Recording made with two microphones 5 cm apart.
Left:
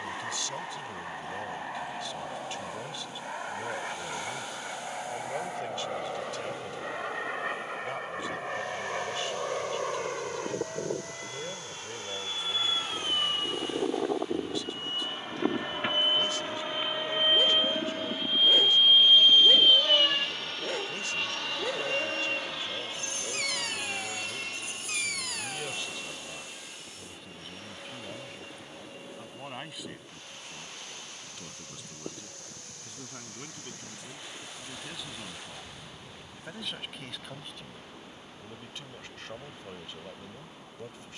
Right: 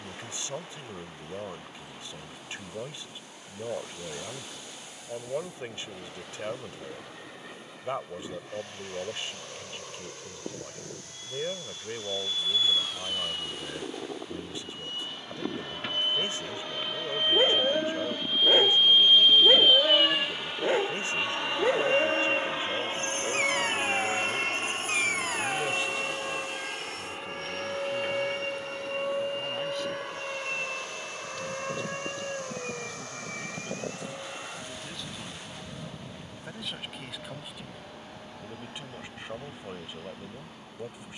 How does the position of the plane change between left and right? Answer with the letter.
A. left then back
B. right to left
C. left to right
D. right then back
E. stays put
C.